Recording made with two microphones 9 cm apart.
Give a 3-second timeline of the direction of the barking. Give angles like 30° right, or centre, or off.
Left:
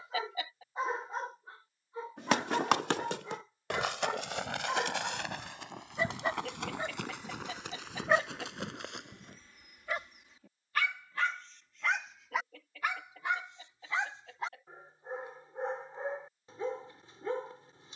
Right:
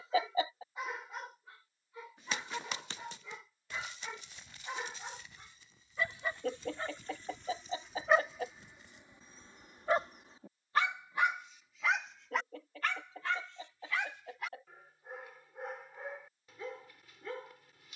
30° left, 30° left, 10° left, 30° right, 20° left, 30° left.